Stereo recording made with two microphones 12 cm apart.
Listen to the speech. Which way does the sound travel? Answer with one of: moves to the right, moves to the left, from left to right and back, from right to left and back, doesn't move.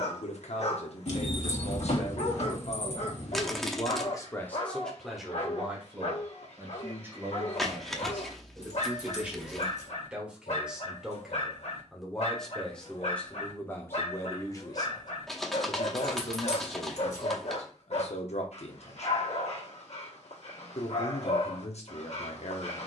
from left to right and back.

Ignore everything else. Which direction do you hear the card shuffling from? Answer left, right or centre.
centre.